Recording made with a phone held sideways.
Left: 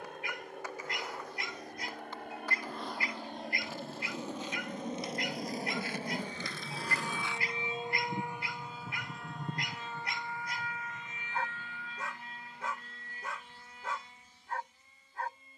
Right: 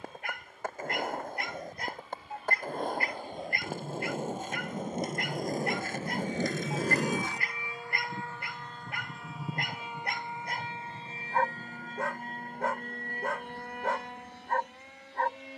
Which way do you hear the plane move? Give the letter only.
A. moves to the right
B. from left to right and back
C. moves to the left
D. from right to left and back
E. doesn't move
A.